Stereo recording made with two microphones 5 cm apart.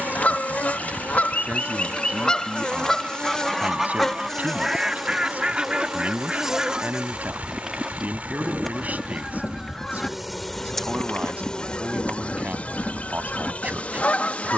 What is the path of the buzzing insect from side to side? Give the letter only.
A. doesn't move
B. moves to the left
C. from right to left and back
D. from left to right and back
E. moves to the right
D.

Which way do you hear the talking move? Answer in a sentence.
You can hear the talking stay put.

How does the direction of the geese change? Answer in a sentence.
In this clip you hear the geese move from left to right and back again.